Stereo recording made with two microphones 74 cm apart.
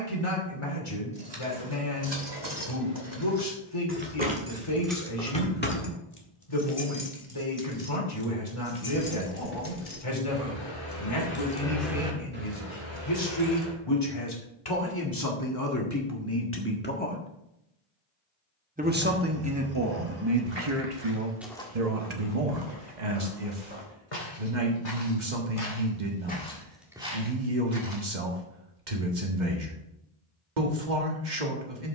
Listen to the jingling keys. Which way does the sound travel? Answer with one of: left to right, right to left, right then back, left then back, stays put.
left then back.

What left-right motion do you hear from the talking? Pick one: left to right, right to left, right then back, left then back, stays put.
left to right.